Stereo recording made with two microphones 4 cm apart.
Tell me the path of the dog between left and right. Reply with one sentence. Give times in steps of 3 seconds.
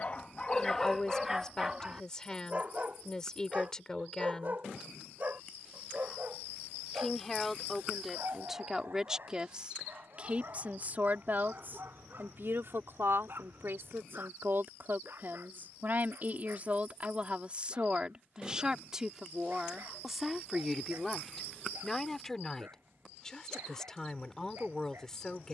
In this clip you hear the dog in the centre from 0 s and on the right from 3 s.